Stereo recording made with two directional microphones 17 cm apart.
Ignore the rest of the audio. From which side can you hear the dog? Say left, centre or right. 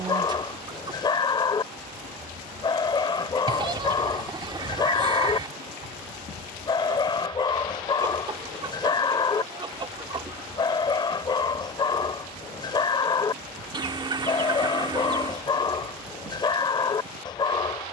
left.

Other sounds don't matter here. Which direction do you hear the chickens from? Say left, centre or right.
right.